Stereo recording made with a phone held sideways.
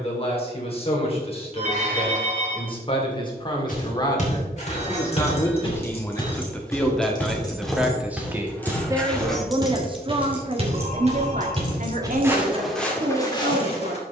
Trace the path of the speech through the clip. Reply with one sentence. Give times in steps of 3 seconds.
You can hear the speech on the left from 0 s, in the centre from 6 s and on the right from 9 s.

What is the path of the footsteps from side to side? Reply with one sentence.
In this clip you hear the footsteps move from left to right and back again.